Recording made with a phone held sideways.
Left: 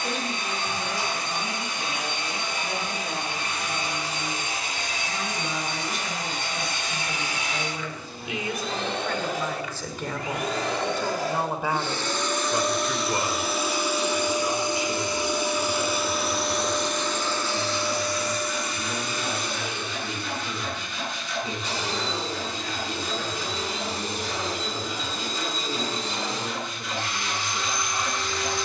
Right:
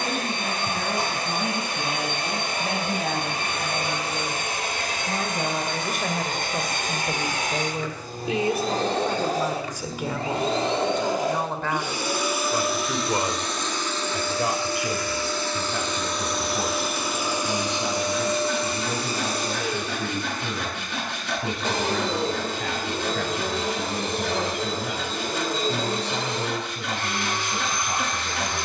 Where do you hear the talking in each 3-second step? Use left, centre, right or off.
right, right, right, centre, right, right, right, right, right, right.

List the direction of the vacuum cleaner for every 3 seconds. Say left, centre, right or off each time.
right, right, right, right, centre, centre, right, right, right, right.